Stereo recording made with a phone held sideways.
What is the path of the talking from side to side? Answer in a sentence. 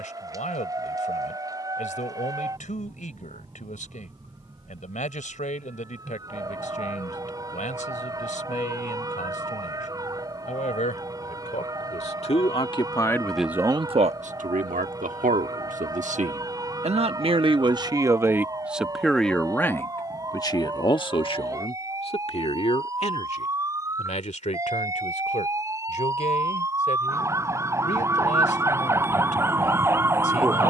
In this clip you hear the talking go right and come back.